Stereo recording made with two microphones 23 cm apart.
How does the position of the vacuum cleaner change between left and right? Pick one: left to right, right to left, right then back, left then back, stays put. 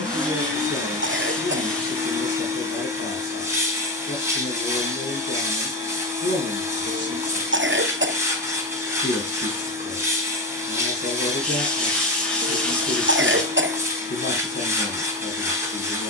stays put.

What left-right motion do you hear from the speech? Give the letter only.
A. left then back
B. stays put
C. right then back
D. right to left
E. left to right
B.